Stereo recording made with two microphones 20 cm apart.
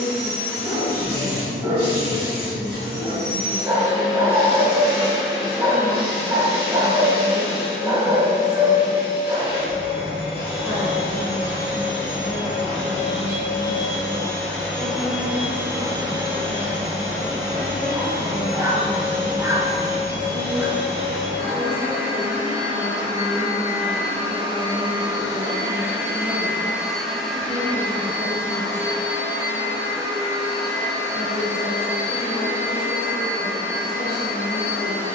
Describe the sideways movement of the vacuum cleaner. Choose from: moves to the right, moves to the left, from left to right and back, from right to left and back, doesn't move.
from left to right and back.